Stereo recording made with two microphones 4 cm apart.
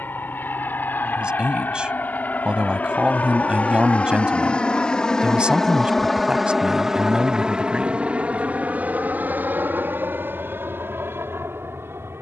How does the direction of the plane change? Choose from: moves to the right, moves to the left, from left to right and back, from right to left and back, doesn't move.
moves to the right.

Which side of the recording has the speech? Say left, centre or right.
right.